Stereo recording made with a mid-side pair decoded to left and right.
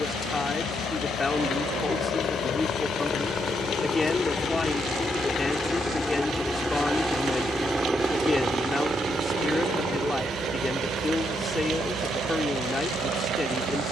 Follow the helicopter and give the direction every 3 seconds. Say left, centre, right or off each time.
left, left, centre, right, right.